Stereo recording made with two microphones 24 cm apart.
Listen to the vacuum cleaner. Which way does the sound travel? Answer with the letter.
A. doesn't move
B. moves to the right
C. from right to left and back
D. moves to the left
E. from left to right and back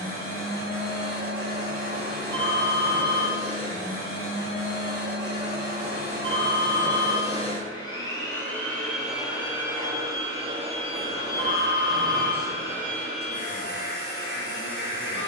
E.